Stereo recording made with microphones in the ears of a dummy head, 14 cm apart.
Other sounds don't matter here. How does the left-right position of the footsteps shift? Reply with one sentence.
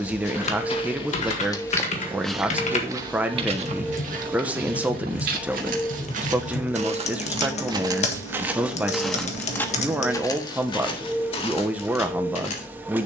In this clip you hear the footsteps go right and come back.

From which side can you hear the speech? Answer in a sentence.
You can hear the speech in the centre.